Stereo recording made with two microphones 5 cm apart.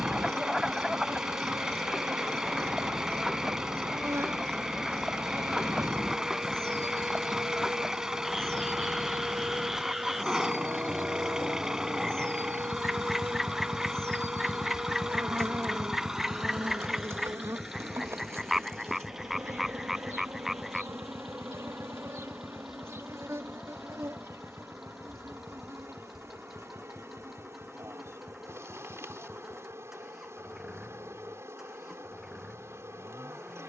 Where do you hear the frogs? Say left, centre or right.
centre.